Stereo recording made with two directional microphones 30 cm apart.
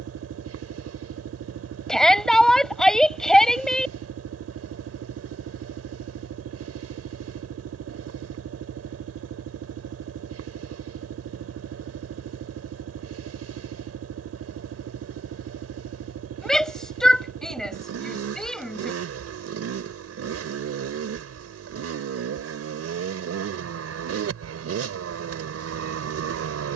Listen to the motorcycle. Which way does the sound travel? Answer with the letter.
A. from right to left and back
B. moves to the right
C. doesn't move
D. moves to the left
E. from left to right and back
C.